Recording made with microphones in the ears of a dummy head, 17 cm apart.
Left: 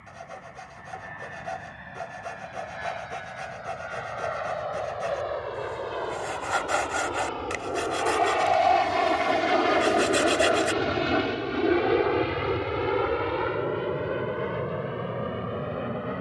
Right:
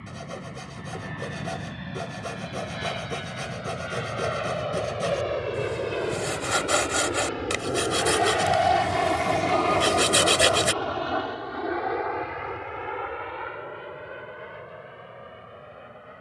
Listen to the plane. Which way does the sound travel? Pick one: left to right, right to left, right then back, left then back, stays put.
right to left.